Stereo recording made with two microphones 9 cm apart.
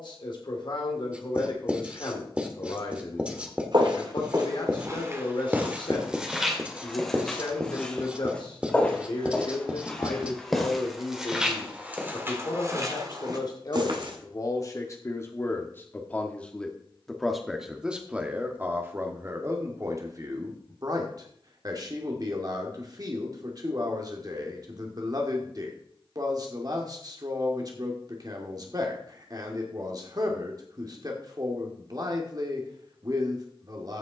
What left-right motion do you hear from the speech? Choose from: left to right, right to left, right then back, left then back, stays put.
left to right.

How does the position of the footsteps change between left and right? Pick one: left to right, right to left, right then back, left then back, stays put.
left then back.